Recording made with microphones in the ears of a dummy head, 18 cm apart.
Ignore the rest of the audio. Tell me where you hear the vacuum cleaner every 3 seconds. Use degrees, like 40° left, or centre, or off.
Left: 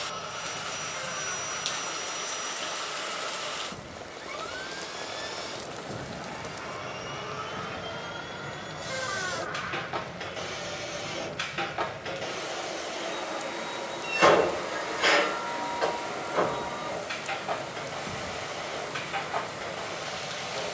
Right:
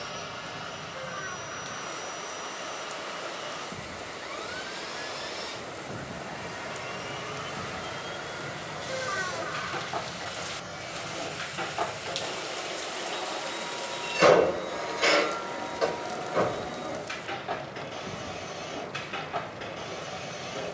20° right, 20° right, 20° right, 30° left, 10° left, 10° right, 20° right.